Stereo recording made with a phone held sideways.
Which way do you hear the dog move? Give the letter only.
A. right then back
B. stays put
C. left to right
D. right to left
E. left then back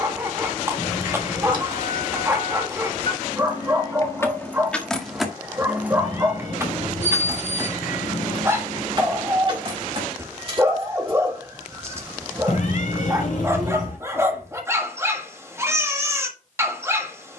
B.